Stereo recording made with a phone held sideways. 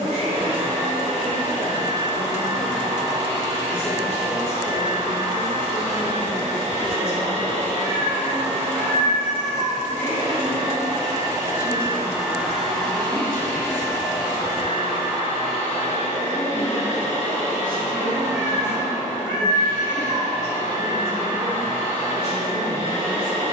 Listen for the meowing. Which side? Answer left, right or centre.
right.